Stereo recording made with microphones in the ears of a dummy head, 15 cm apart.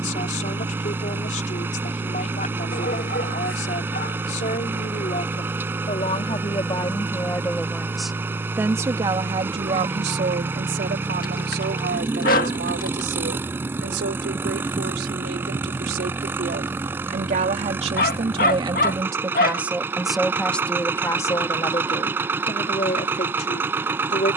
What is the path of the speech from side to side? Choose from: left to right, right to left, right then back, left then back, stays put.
right then back.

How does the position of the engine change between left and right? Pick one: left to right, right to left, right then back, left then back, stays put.
stays put.